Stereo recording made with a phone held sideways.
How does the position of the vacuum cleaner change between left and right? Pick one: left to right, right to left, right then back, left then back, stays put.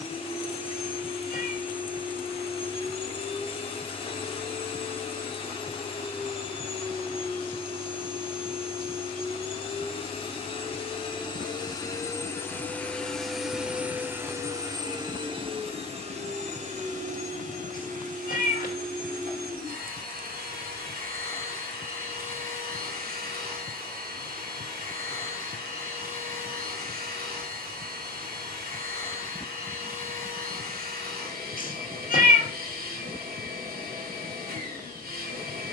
left to right.